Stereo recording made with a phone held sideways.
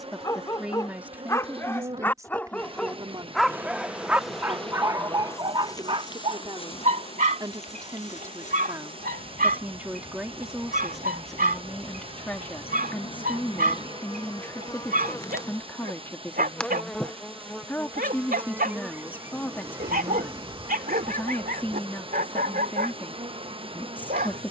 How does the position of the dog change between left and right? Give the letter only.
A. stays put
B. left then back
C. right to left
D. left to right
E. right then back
D.